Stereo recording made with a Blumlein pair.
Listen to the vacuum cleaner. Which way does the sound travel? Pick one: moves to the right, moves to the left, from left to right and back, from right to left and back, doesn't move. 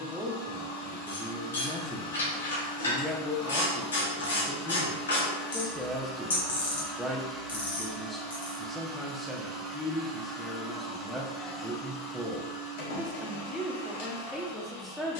from left to right and back.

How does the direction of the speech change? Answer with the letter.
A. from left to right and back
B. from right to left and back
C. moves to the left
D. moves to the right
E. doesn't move
E.